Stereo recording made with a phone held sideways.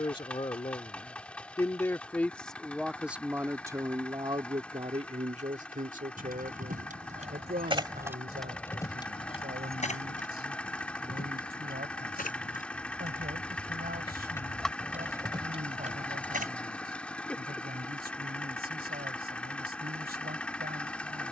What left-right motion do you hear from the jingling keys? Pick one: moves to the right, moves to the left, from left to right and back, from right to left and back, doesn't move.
from right to left and back.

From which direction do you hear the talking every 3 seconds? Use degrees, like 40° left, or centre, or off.
20° left, 30° right, 70° right, 80° right, 80° right, 80° right, 80° right.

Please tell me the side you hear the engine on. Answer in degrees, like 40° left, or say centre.
10° left.